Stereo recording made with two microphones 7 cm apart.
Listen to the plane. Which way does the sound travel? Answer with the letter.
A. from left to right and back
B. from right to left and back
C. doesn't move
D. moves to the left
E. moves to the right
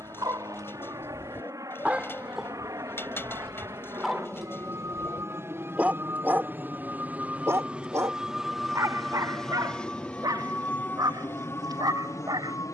D.